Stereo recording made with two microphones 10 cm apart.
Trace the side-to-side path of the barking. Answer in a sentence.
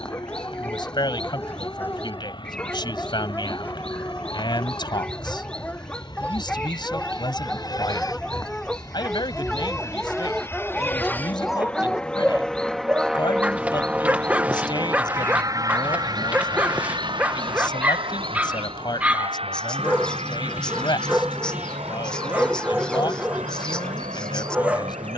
In this clip you hear the barking go from the left side to the right.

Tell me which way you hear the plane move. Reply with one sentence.
You can hear the plane move from left to right.